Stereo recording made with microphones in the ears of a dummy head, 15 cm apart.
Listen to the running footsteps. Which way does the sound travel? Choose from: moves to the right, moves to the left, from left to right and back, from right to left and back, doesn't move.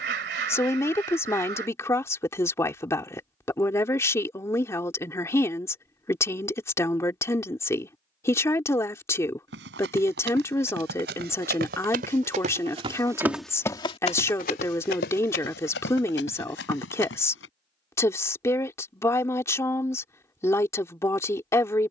moves to the left.